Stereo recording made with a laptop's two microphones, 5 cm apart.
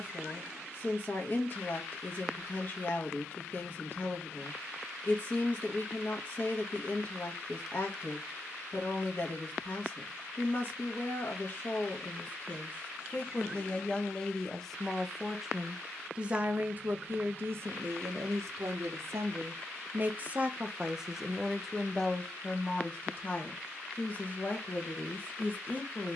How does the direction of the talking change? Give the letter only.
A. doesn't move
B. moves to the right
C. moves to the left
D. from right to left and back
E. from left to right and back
E.